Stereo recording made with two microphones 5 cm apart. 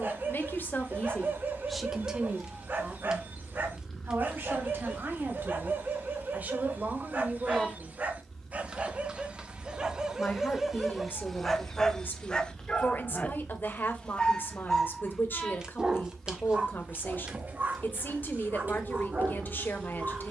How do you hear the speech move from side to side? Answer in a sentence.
You can hear the speech go right and come back.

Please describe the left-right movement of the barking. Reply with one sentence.
You can hear the barking go left and come back.